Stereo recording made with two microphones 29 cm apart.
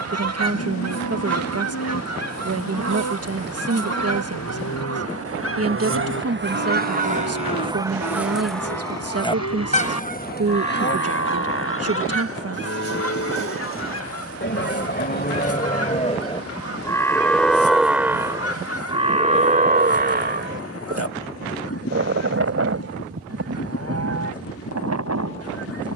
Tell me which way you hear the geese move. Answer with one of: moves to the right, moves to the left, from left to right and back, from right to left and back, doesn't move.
moves to the left.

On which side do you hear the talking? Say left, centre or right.
right.